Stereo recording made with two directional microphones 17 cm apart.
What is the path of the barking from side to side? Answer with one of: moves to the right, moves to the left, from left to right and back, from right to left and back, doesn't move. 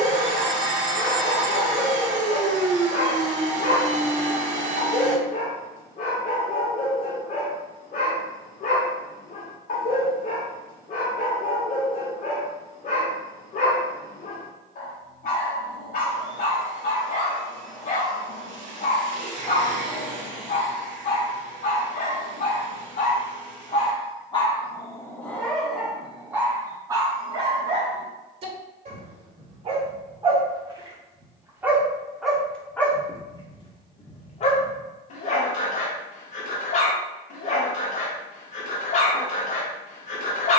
from left to right and back.